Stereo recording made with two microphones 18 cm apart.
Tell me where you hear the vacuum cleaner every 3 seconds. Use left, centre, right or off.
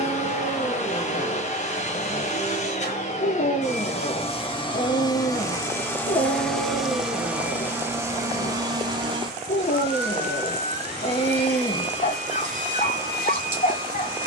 left, left, centre, right, right.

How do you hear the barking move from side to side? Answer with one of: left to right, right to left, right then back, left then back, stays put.
stays put.